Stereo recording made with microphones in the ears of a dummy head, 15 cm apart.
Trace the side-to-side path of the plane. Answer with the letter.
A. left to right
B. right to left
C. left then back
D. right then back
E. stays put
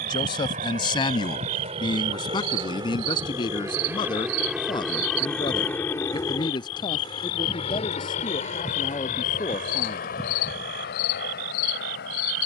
B.